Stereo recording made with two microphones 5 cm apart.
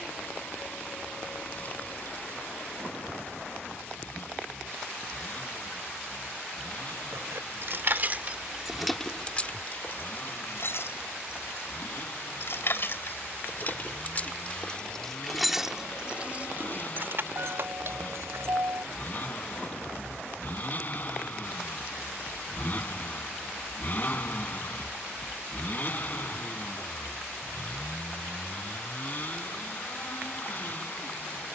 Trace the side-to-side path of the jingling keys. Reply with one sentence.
In this clip you hear the jingling keys move from right to left and back again.